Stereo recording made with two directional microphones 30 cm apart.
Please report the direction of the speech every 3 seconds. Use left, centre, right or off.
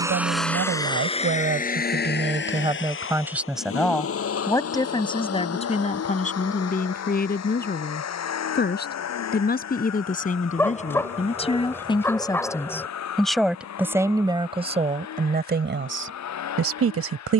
right, centre, left, left, centre, right.